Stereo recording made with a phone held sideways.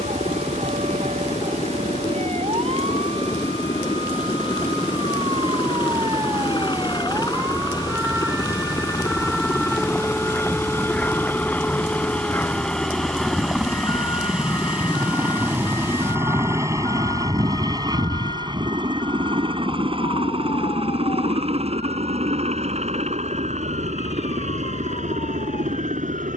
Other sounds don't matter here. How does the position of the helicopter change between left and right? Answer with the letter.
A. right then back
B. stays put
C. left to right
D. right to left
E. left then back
C.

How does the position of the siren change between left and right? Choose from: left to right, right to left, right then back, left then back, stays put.
right to left.